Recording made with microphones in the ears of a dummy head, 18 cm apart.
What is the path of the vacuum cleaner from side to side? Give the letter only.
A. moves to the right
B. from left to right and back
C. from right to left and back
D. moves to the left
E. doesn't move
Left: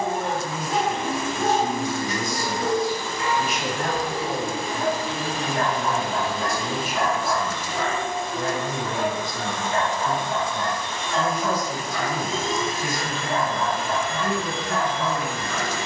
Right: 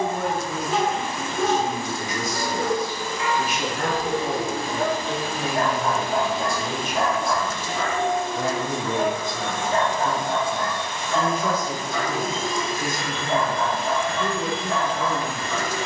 B.